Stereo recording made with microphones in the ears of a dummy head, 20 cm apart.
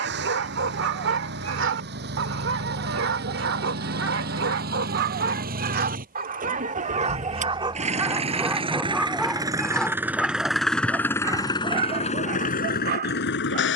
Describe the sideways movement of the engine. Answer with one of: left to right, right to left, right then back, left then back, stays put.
right to left.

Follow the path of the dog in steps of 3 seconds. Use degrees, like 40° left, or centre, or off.
60° right, 60° right, 20° right, 10° right, 50° right.